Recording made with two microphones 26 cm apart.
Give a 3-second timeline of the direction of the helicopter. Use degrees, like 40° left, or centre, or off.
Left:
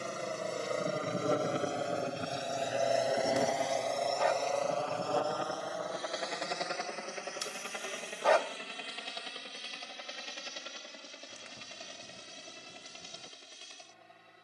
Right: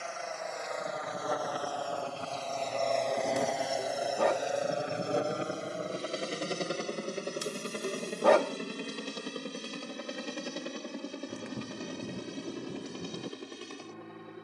30° left, 10° right, 40° right, 60° right, 60° right.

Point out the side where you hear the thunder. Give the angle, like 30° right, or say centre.
60° right.